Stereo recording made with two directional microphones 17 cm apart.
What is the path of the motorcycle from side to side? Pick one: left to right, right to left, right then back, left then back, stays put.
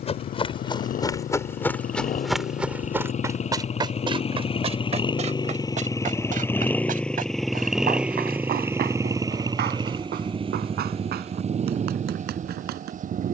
left to right.